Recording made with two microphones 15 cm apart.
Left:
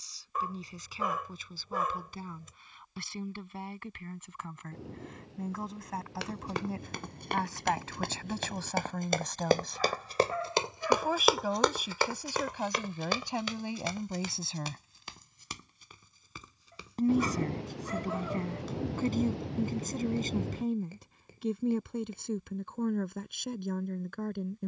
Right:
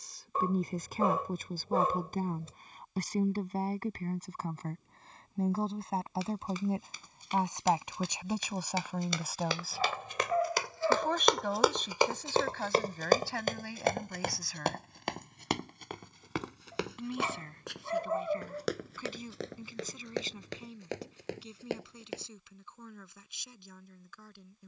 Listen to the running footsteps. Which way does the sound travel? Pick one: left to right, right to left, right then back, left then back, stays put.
left to right.